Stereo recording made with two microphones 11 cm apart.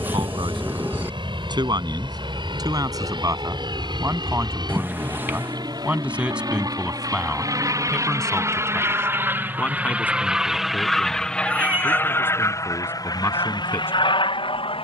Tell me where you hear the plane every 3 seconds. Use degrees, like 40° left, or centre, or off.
50° right, 50° right, 40° right, centre, 40° left.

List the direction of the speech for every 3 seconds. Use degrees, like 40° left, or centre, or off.
40° right, 20° right, centre, 20° left, 20° left.